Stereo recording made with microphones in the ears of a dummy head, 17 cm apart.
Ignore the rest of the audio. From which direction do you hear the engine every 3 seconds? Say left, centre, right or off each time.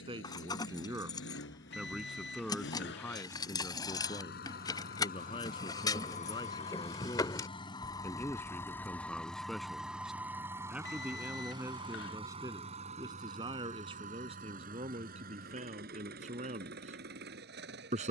left, left, left, centre, right, right.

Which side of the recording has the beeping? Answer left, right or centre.
left.